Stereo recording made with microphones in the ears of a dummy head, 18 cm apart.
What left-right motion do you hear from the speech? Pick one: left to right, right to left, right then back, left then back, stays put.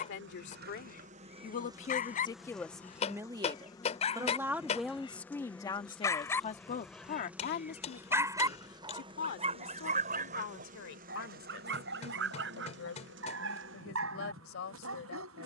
right then back.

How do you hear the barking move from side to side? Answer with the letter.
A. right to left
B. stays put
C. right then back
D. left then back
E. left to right
E.